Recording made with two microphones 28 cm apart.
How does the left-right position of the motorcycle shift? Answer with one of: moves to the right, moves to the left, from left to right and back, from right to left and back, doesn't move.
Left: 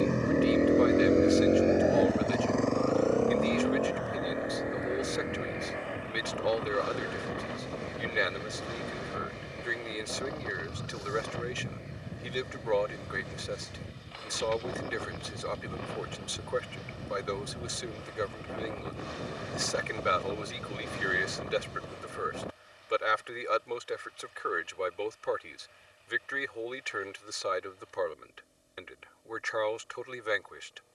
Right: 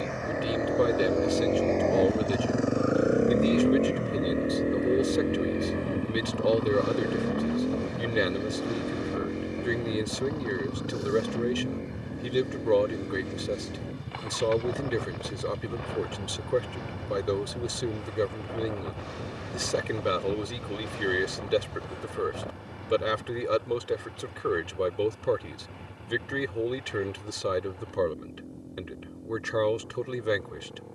moves to the right.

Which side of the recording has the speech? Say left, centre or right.
right.